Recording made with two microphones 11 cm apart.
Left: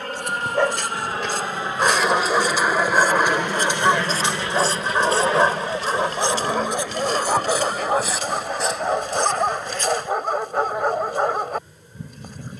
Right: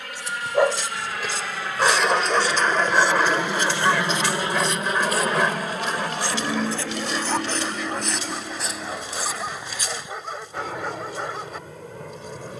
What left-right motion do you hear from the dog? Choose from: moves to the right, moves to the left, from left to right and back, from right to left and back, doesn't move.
moves to the left.